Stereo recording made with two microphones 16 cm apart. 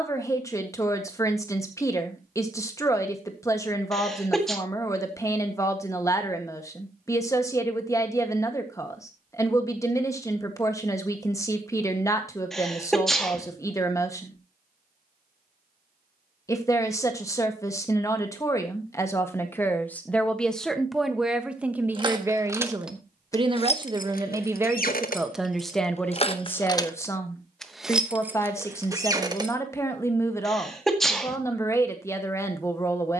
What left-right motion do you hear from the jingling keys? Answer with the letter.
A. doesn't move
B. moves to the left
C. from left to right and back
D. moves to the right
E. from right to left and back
E.